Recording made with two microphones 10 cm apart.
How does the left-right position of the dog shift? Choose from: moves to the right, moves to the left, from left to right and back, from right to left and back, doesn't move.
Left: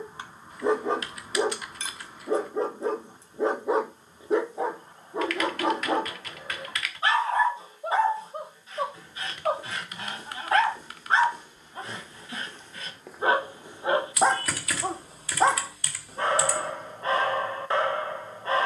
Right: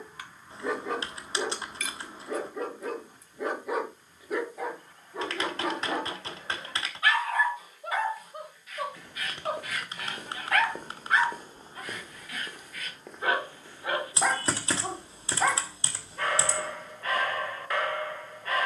doesn't move.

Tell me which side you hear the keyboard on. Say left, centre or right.
right.